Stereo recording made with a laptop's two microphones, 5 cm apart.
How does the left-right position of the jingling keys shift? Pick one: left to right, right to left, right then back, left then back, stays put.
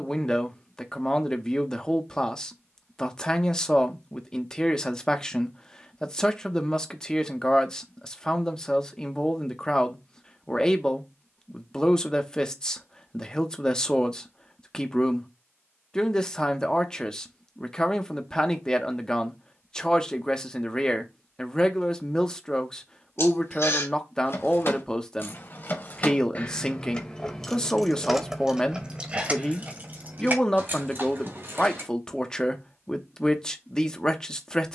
left to right.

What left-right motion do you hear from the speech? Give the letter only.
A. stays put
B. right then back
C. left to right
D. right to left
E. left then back
A.